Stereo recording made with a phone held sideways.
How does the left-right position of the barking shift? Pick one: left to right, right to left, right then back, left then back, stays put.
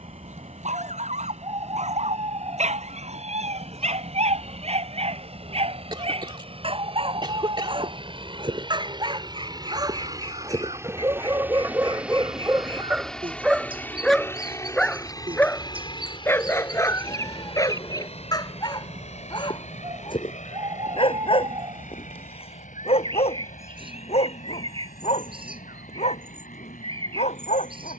right to left.